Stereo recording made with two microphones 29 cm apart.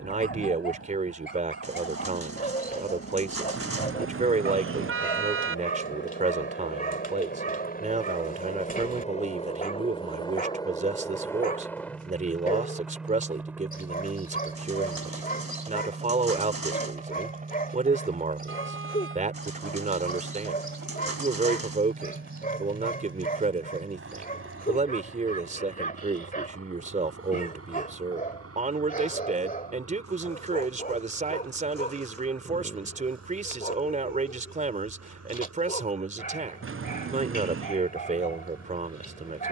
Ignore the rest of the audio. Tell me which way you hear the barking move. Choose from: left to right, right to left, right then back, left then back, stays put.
stays put.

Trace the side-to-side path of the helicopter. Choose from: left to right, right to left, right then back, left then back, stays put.
left to right.